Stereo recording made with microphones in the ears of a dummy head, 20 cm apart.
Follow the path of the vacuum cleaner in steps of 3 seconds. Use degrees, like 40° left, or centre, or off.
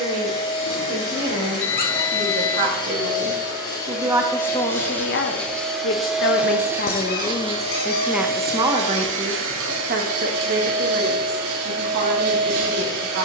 30° left, 10° left, 30° right, 70° right, 80° right.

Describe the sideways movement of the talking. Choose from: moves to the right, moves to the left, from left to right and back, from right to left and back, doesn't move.
from right to left and back.